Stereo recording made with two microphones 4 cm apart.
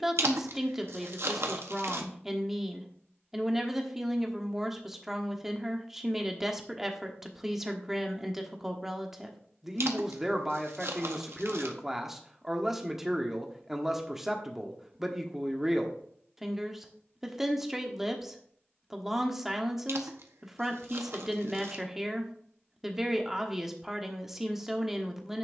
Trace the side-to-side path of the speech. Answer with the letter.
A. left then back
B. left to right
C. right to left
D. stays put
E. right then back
D.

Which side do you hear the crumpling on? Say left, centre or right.
right.